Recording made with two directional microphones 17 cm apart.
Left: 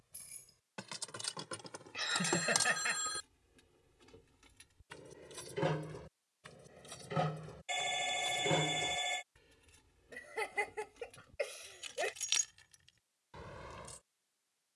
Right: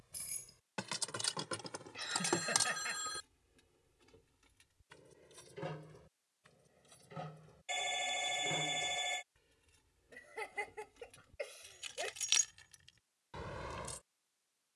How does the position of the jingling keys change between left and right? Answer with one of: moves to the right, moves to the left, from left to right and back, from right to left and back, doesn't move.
from right to left and back.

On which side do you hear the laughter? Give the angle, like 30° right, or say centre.
30° left.